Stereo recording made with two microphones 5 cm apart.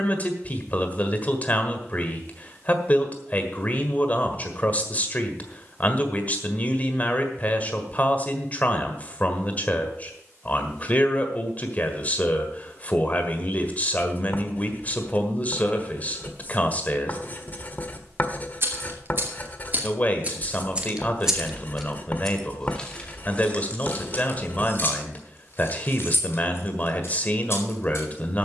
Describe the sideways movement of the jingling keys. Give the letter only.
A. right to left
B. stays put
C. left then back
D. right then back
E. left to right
A.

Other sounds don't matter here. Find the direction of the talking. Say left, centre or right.
left.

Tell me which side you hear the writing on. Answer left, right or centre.
left.